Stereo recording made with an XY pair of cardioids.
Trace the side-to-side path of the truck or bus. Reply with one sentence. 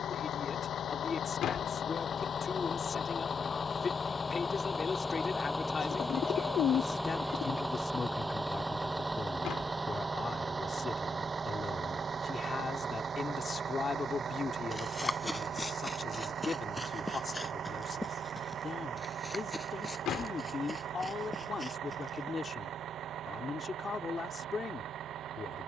In this clip you hear the truck or bus go from the left side to the right.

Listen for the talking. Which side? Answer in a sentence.
You can hear the talking on the left.